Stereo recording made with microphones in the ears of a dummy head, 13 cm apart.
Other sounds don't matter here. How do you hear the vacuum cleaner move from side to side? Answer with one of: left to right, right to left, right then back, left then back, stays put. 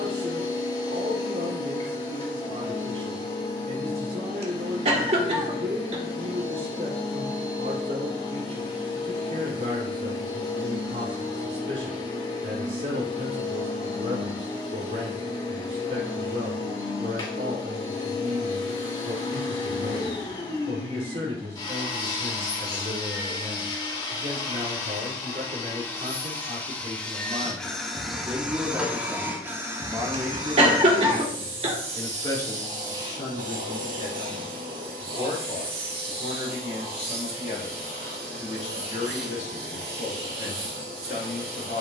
left to right.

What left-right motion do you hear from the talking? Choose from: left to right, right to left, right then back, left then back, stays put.
right to left.